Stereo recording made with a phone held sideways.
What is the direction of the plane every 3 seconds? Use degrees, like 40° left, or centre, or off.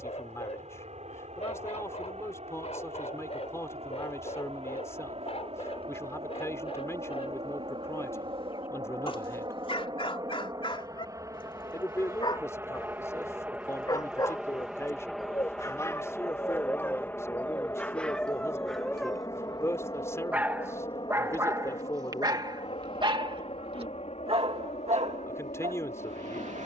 60° right, 50° right, 40° right, 30° right, 10° right, 10° left, 30° left, 40° left, 50° left.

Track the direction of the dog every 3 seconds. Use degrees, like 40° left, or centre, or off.
50° left, 50° left, 40° left, 40° left, 30° left, 20° left, 10° right, 30° right, 60° right.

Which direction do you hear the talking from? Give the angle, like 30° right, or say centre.
20° left.